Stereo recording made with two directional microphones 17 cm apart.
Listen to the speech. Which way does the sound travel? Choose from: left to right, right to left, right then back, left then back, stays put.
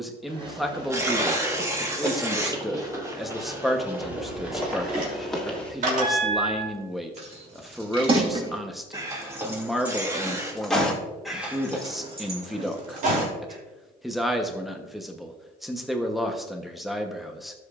stays put.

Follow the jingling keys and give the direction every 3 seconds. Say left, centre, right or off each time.
off, right, right, centre, right, off.